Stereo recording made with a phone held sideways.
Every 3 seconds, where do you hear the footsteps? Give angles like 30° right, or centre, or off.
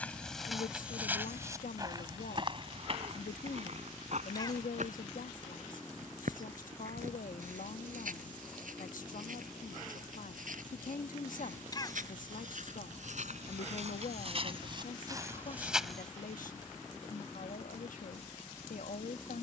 20° right, 60° right, 70° right, 80° right, 60° right, 10° right, off.